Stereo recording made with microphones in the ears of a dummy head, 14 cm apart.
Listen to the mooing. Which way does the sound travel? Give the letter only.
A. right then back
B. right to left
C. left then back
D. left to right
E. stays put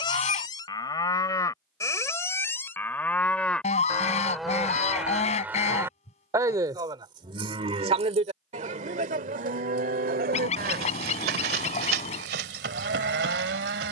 D.